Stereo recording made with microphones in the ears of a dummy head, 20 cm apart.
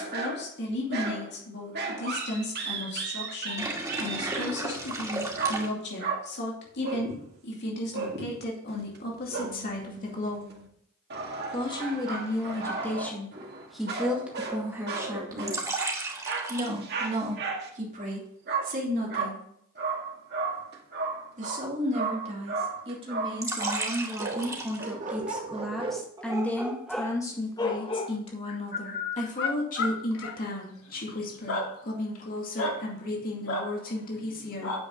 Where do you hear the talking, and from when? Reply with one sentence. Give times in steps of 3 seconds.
You can hear the talking on the left from 0 s, in the centre from 12 s, on the right from 15 s, in the centre from 24 s and on the left from 27 s.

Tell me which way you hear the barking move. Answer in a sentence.
In this clip you hear the barking move to the left.